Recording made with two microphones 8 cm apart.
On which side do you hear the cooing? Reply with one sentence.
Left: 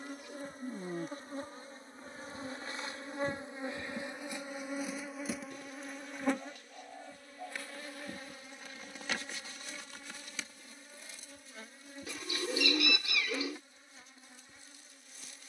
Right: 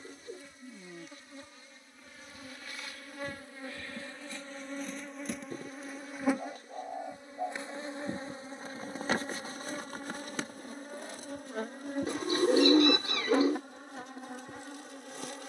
In this clip you hear the cooing on the right.